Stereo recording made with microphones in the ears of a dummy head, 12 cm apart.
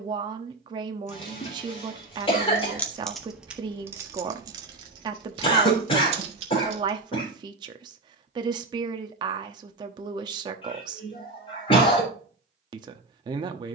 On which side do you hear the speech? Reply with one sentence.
You can hear the speech on the right.